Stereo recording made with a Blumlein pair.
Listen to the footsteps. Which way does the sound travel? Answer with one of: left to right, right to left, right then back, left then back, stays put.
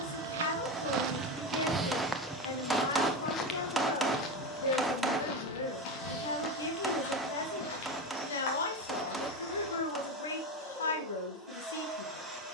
right to left.